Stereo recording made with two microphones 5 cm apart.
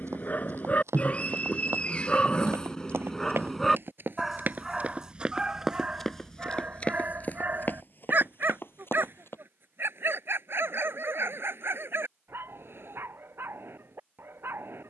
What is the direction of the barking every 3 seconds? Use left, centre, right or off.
left, centre, right, right, right.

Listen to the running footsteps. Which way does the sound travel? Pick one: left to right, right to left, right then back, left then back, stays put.
right to left.